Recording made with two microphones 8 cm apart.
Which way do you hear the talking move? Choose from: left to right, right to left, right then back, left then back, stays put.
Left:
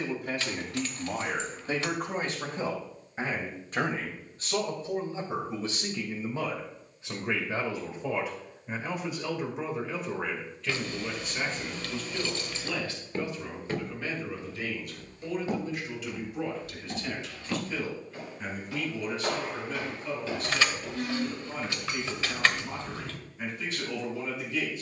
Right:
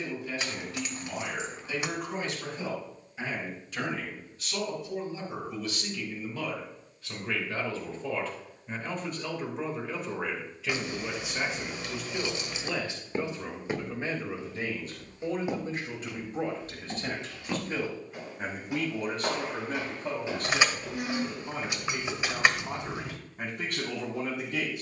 left to right.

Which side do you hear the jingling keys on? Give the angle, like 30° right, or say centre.
20° right.